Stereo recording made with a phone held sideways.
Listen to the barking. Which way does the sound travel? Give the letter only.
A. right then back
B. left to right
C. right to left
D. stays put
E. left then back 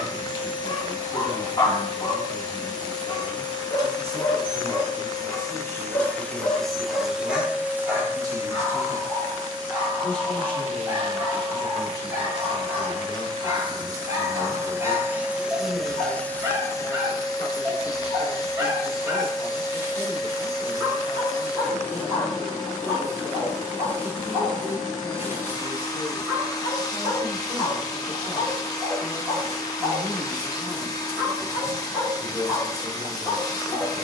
B.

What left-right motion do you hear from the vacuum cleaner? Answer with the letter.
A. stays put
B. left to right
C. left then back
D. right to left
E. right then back
E.